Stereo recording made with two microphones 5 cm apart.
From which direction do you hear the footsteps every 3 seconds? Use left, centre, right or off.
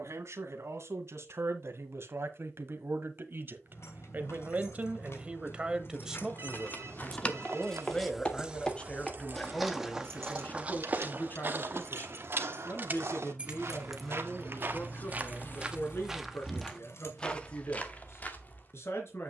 off, off, left, right, right, centre, left.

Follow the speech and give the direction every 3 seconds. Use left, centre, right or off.
right, right, centre, left, left, left, left.